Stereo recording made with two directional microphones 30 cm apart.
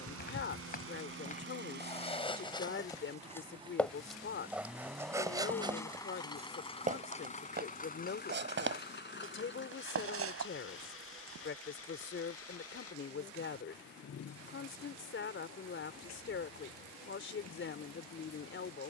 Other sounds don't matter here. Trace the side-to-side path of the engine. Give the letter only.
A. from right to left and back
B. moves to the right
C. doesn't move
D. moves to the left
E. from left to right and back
D.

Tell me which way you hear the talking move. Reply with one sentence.
In this clip you hear the talking stay put.